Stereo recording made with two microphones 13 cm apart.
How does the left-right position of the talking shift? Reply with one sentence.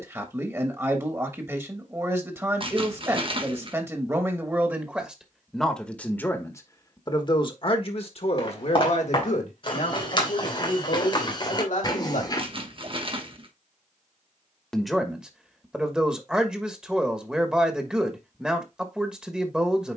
In this clip you hear the talking move from right to left and back again.